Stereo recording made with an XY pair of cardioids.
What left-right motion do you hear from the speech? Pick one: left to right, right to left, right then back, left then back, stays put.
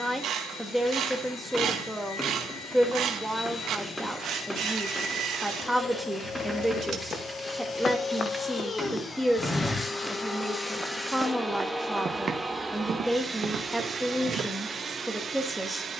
stays put.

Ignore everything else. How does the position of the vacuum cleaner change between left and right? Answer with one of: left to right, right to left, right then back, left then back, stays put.
left to right.